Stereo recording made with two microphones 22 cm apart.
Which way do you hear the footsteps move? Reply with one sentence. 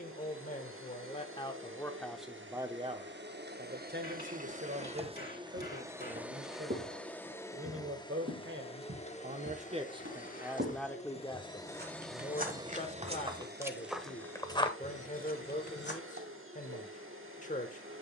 You can hear the footsteps move to the left.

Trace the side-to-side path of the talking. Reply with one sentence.
You can hear the talking go right and come back.